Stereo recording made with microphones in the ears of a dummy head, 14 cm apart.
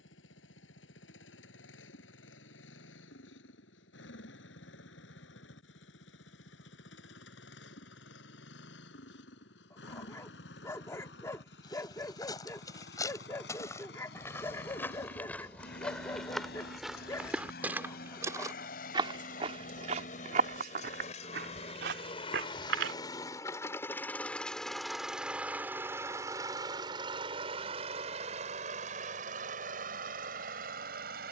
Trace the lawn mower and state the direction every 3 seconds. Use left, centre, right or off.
left, left, left, left, left, left, left, left, centre, right, right.